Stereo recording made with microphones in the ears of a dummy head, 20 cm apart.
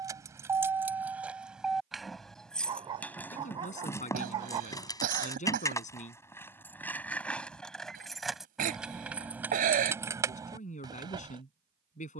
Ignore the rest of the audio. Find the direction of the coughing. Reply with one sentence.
In this clip you hear the coughing on the right.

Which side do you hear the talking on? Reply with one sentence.
In this clip you hear the talking on the left.